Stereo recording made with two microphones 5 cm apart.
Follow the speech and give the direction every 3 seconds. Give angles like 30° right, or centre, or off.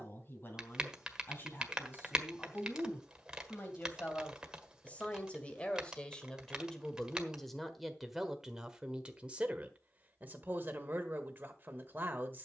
50° left, 30° left, 10° left, 30° right.